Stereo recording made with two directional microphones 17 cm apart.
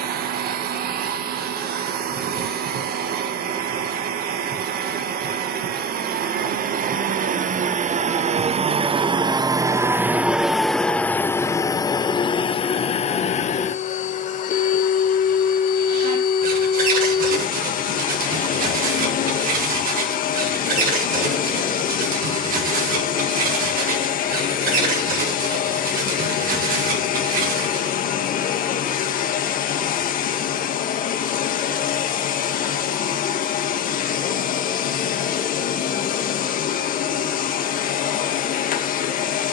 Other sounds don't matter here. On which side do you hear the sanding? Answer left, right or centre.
right.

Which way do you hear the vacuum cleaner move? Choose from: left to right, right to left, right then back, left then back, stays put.
right to left.